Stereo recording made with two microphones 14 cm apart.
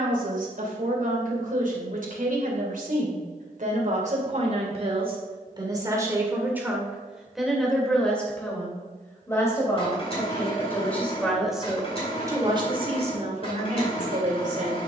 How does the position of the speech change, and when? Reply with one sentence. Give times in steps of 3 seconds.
In this clip you hear the speech on the right from 0 s, in the centre from 6 s and on the right from 12 s.